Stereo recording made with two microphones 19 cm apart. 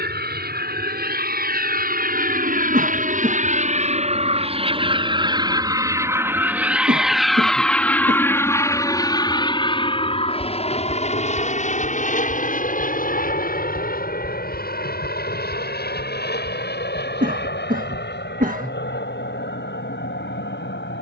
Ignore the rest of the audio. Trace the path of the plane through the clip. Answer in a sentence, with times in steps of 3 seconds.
In this clip you hear the plane on the right from 0 s, in the centre from 6 s and on the left from 9 s.